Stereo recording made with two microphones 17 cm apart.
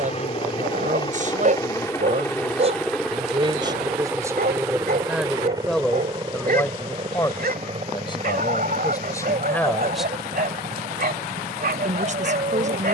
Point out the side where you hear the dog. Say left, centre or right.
right.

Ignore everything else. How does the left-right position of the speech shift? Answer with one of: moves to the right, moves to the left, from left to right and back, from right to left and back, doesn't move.
from right to left and back.